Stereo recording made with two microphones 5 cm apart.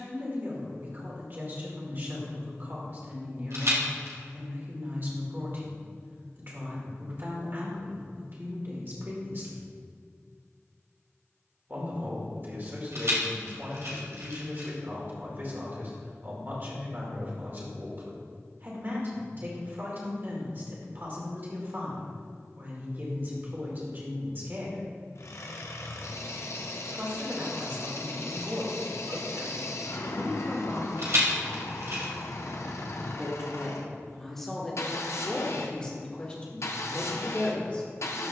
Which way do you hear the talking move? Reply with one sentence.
You can hear the talking move from right to left.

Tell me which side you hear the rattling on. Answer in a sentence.
In this clip you hear the rattling on the right.